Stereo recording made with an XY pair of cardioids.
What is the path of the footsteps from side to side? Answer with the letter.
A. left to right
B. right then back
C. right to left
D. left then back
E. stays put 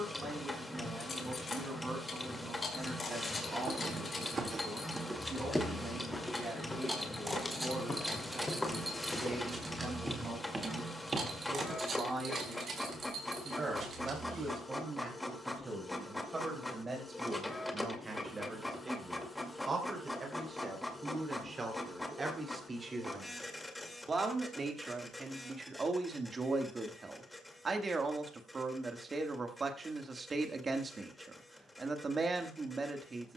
D.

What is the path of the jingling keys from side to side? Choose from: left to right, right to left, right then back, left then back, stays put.
left to right.